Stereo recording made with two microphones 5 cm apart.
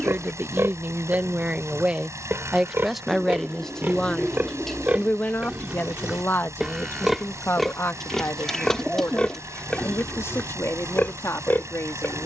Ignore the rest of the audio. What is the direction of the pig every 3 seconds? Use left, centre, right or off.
right, right, centre, left.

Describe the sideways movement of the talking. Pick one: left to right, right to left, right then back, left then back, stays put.
right to left.